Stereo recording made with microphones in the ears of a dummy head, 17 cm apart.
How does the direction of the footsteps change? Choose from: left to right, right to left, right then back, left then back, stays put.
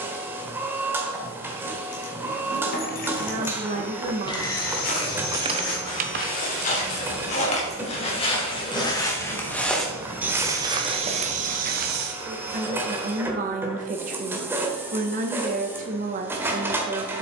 left to right.